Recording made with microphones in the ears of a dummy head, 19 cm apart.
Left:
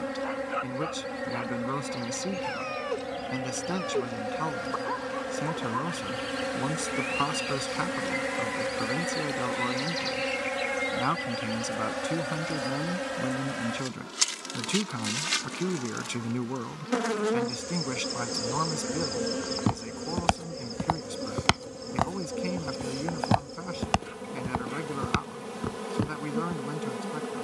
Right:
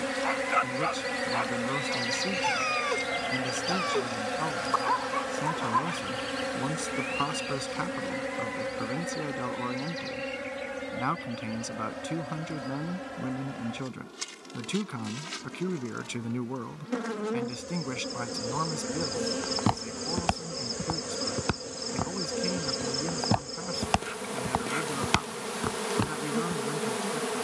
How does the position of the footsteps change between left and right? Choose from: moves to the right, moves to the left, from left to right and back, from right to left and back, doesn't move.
from right to left and back.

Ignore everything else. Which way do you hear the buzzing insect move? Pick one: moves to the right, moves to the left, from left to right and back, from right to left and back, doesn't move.
from right to left and back.